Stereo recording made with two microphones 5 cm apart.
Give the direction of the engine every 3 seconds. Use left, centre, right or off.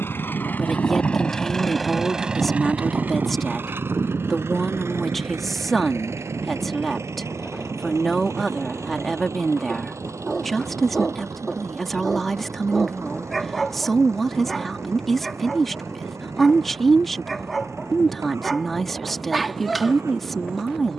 centre, right, right, right, right, right, right.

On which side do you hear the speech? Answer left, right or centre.
centre.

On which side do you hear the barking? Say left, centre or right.
centre.